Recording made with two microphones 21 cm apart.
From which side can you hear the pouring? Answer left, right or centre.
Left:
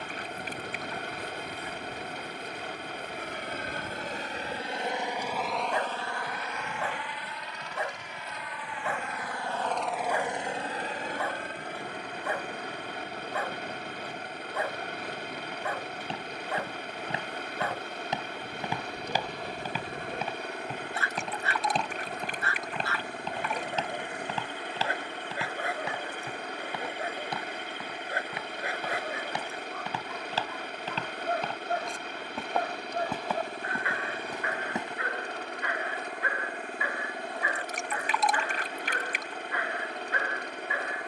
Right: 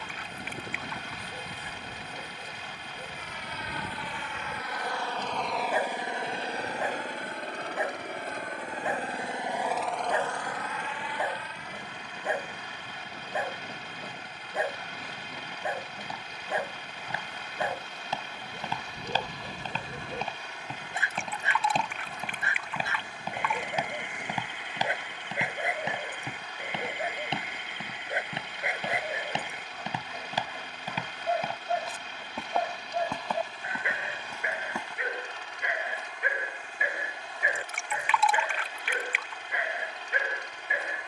left.